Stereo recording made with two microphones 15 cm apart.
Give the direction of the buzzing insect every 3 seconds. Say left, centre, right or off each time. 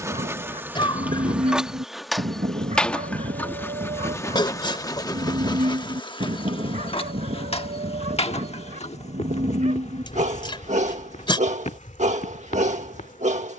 centre, left, left, left, left.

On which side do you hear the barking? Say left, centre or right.
right.